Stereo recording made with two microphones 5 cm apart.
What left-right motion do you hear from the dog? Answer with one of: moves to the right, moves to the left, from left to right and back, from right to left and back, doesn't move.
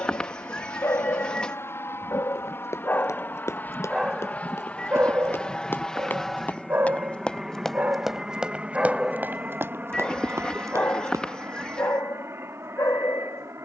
from left to right and back.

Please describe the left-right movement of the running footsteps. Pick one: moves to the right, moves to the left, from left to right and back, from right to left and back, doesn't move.
moves to the right.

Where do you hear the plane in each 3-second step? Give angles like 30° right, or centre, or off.
50° left, 30° left, 10° right, 30° right, 50° right.